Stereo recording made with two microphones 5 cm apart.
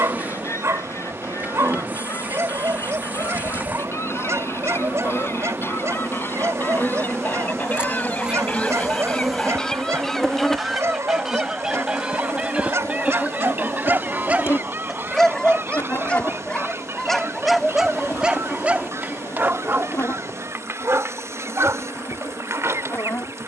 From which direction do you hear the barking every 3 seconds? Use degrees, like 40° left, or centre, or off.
70° right, 70° right, 70° right, 70° right, 50° right, 10° left, 40° right, 70° right.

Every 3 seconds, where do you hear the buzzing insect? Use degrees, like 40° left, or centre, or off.
40° right, 40° right, 30° right, 10° left, 40° left, 60° left, 60° left, 60° left.